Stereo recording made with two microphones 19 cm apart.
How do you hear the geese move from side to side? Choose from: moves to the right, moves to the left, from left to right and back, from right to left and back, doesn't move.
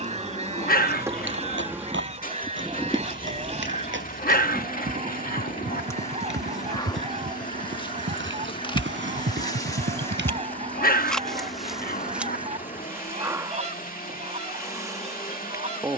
doesn't move.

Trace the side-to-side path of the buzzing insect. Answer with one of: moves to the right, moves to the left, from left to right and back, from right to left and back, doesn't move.
from right to left and back.